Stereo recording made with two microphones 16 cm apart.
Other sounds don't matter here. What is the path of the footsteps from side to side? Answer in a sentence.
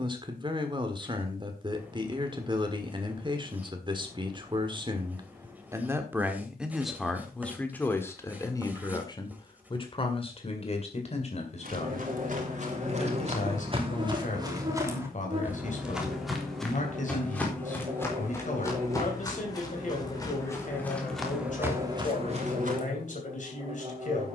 In this clip you hear the footsteps move from right to left and back again.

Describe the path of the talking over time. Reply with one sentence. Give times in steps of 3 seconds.
In this clip you hear the talking on the right from 0 s, in the centre from 6 s and on the left from 9 s.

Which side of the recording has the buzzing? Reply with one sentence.
You can hear the buzzing on the right.